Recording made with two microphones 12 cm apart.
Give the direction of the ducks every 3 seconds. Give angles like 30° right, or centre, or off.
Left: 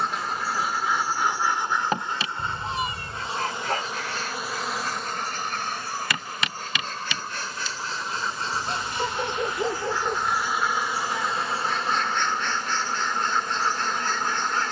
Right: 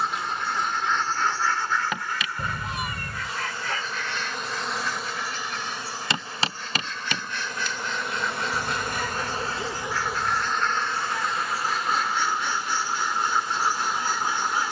20° left, 40° left, 40° left, 10° left, 10° right.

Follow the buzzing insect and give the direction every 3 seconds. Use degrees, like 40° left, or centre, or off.
30° left, centre, 50° right, centre, 40° left.